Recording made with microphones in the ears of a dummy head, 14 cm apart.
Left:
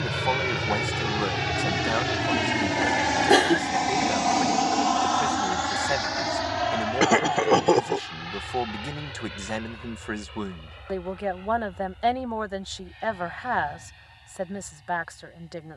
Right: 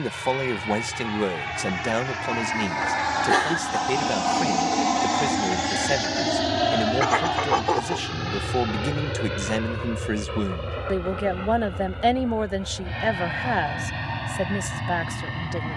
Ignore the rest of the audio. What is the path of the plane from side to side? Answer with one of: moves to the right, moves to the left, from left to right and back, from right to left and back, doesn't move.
moves to the right.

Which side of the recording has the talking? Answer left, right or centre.
right.